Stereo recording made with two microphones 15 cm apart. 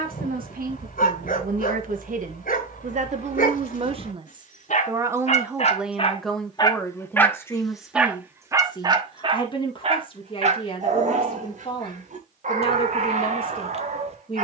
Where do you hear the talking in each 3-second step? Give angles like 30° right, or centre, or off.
70° right, 30° right, 20° left, 40° left, 40° left.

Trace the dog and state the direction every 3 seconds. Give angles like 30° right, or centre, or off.
70° left, 60° left, centre, 50° right, 60° right.